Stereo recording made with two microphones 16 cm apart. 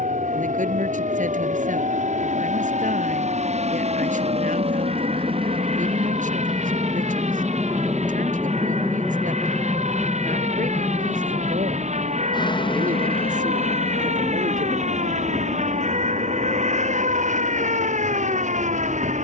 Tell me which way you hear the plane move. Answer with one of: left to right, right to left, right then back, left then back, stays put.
right to left.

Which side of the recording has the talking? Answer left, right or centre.
right.